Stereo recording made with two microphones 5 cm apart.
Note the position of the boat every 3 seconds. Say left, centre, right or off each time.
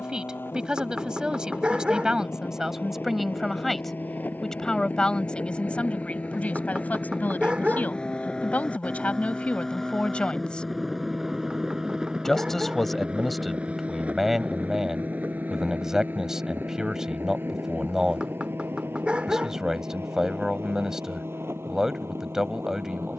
left, left, left, centre, right, right, right, right.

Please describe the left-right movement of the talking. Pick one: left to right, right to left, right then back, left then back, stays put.
left then back.